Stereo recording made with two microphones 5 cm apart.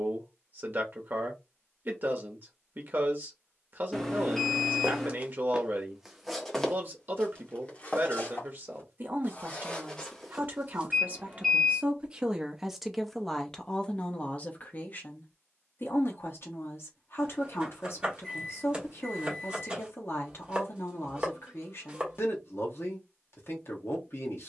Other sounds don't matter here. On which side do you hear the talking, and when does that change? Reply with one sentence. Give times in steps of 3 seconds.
You can hear the talking on the right from 0 s, in the centre from 12 s and on the left from 15 s.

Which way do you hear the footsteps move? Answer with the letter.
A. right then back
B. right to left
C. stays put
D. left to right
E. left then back
E.